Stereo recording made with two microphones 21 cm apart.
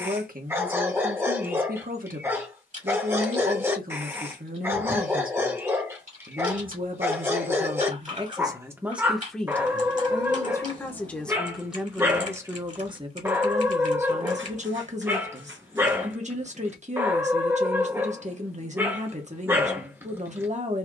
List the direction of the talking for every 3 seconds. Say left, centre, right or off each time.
right, right, right, centre, right, right, right.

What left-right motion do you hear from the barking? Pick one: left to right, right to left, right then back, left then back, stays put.
stays put.